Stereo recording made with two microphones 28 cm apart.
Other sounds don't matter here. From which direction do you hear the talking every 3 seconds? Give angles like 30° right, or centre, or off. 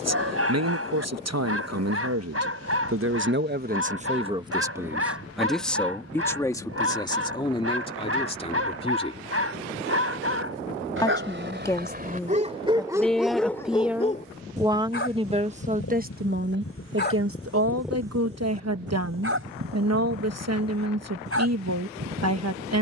60° right, 20° right, 20° left, 10° left, centre, 40° right, 60° right, 60° right.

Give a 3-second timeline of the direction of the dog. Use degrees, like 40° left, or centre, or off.
50° right, 50° right, 50° right, 50° right, centre, 40° left, 40° right, 50° right.